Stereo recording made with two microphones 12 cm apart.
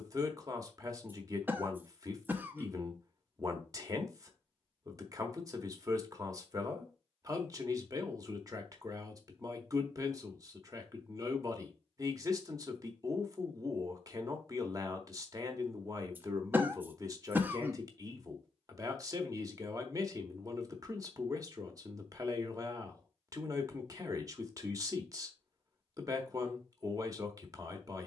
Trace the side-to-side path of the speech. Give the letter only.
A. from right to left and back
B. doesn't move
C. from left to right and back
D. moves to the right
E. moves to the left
B.